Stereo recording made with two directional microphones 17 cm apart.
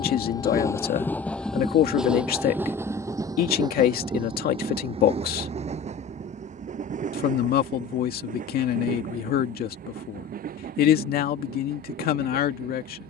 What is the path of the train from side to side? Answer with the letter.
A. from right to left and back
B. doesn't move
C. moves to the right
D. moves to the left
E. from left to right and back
C.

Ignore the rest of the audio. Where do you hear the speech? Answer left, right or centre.
left.